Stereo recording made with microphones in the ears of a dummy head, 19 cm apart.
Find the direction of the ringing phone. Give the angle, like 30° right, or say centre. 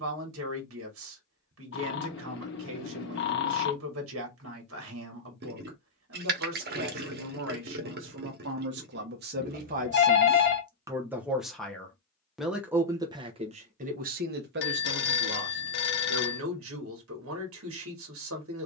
50° left.